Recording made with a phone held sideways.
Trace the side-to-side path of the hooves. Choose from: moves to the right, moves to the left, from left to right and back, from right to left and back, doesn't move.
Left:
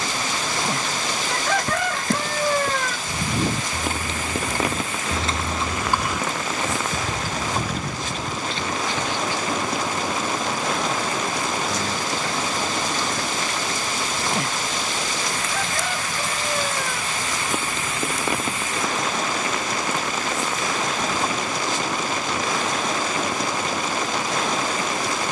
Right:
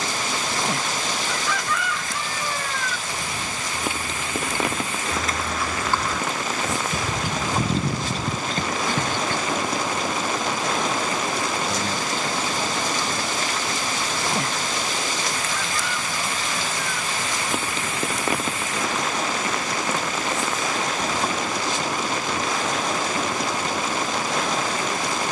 moves to the right.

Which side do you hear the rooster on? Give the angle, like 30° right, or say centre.
50° left.